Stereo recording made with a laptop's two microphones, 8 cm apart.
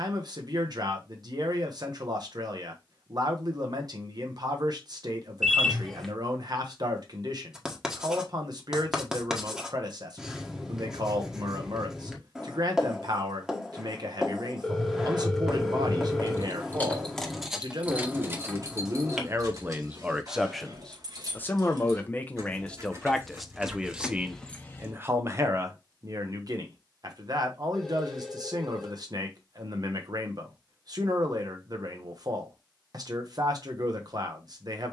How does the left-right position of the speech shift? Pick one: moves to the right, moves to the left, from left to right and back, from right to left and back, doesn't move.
from right to left and back.